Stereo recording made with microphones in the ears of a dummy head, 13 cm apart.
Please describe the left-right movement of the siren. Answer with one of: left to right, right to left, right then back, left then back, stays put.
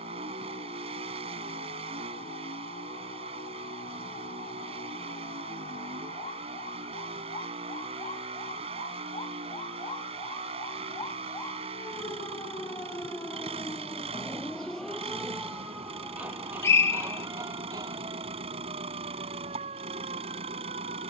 left to right.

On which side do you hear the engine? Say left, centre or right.
right.